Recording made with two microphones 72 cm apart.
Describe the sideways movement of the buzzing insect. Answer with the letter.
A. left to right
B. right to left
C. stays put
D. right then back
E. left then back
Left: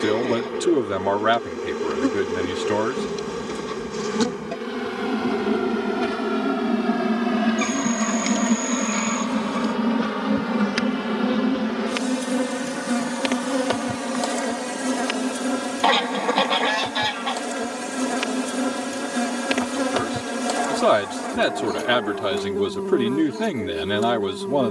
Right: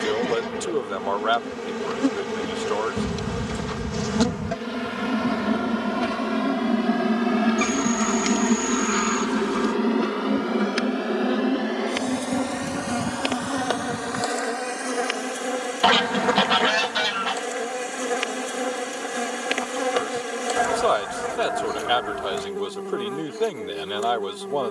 B.